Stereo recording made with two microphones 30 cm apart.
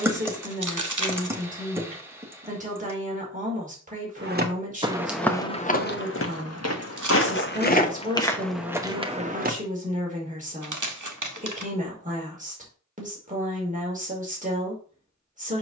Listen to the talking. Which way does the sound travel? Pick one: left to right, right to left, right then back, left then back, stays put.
stays put.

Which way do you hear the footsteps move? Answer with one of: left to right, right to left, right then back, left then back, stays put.
left then back.